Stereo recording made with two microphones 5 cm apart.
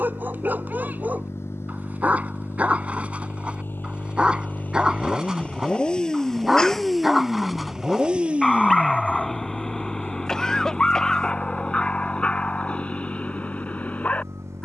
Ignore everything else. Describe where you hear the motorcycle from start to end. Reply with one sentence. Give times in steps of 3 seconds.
In this clip you hear the motorcycle on the left from 0 s, in the centre from 6 s and on the right from 9 s.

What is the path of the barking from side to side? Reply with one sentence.
You can hear the barking go from the right side to the left.